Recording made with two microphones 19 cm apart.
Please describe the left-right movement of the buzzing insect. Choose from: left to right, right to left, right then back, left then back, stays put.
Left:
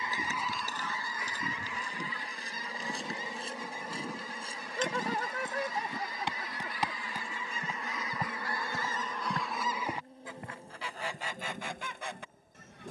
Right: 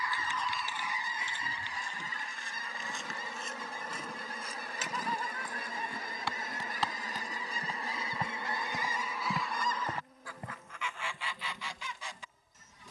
right then back.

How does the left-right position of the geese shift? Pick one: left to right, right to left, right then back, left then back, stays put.
right then back.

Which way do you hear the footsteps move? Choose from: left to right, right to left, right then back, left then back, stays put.
left to right.